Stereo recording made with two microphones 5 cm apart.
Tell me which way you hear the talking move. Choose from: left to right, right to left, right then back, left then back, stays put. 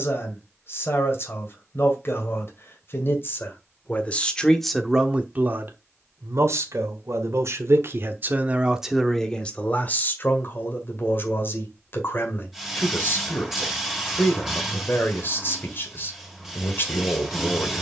right then back.